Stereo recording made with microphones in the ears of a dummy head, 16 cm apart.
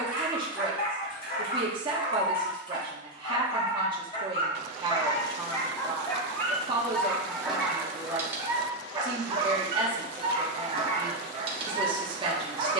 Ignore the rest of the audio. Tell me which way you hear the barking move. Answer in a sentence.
In this clip you hear the barking travel towards the right.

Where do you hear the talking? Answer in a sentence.
In this clip you hear the talking on the right.